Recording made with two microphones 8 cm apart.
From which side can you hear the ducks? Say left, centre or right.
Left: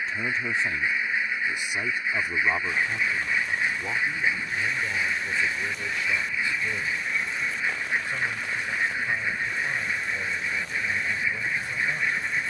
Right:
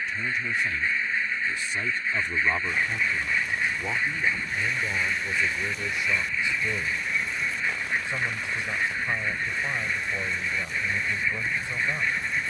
centre.